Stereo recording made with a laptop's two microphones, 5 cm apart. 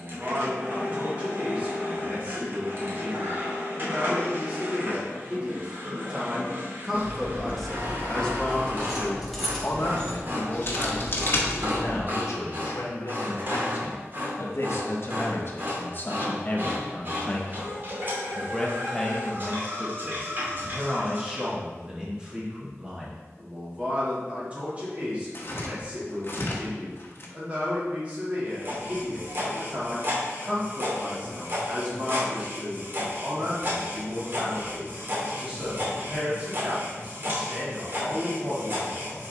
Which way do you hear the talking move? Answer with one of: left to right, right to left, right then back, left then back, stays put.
left then back.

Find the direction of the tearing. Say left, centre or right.
left.